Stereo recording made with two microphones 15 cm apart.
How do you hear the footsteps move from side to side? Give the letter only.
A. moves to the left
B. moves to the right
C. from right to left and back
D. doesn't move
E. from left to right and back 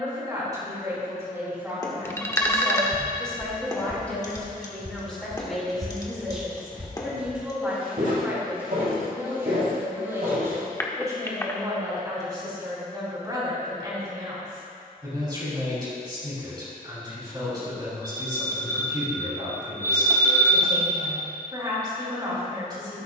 B.